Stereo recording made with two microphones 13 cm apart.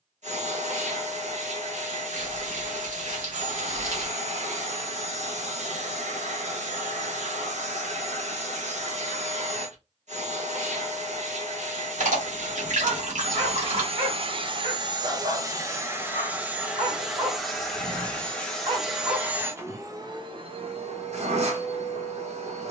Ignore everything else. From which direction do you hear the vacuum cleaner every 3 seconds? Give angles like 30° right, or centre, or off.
60° right, 60° right, 60° right, 60° right, 50° right, 10° right, 20° right, 60° right.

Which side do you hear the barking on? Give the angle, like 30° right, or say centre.
80° right.